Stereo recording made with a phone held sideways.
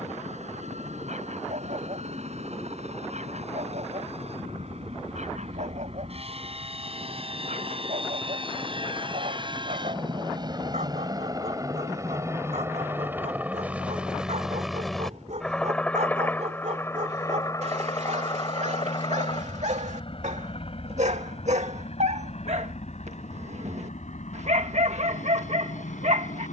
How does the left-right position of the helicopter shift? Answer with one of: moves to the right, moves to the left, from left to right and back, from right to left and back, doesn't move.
moves to the left.